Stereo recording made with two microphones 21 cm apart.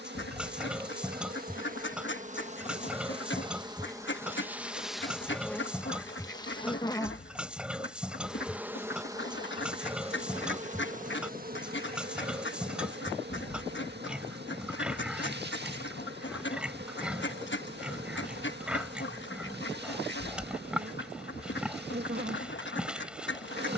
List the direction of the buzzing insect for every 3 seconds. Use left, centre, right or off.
right, centre, centre, right, right, right, right, right.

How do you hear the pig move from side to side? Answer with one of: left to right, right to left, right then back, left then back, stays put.
stays put.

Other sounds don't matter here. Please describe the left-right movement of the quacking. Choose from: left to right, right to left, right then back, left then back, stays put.
stays put.